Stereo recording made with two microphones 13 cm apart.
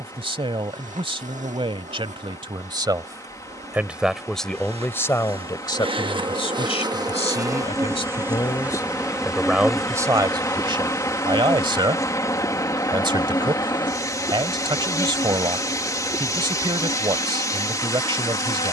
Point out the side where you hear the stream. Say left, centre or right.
left.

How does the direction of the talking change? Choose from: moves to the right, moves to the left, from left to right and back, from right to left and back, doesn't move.
from right to left and back.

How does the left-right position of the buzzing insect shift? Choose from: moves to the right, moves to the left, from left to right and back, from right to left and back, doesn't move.
moves to the left.